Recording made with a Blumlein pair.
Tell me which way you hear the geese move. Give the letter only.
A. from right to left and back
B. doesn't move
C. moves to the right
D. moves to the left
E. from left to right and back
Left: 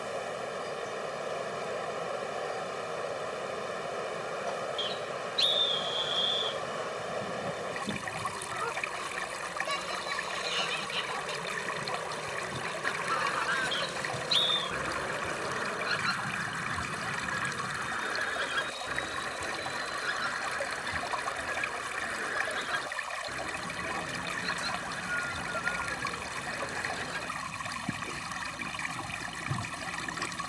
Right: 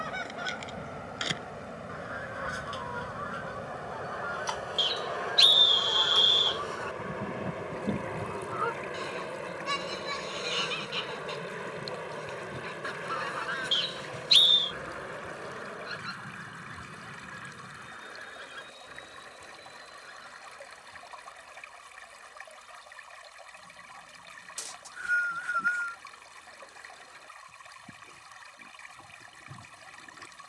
D.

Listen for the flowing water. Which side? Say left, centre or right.
left.